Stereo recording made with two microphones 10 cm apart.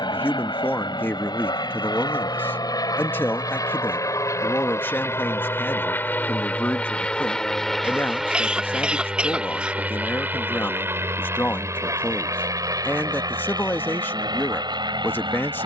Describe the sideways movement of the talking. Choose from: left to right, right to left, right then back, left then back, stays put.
stays put.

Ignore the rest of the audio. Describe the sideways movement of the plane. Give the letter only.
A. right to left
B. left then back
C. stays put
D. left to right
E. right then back
D.